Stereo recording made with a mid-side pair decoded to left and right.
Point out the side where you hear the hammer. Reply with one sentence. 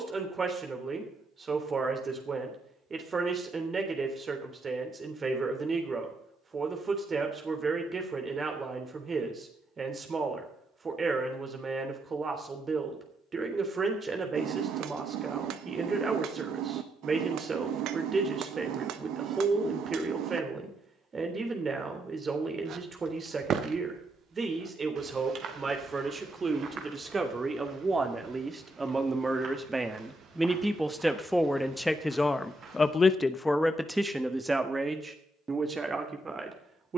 In this clip you hear the hammer on the right.